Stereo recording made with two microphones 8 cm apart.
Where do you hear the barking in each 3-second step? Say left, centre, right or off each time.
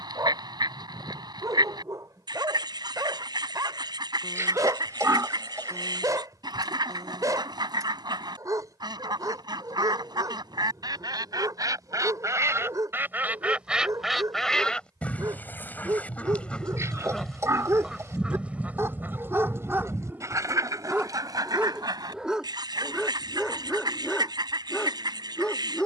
right, right, right, right, right, right, right, centre, centre.